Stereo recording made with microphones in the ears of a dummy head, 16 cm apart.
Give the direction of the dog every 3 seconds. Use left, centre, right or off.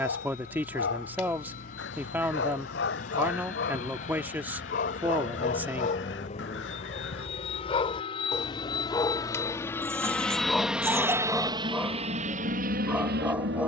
left, left, left, centre, centre.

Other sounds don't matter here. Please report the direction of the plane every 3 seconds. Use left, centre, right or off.
left, left, left, centre, right.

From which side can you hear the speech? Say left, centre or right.
centre.